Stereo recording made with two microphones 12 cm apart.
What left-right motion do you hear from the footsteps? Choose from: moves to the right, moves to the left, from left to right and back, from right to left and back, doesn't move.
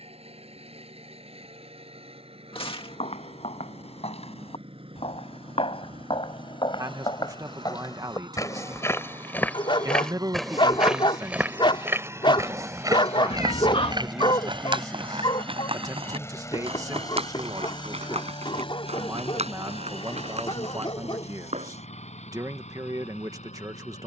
moves to the right.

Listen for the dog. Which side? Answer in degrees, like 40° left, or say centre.
40° left.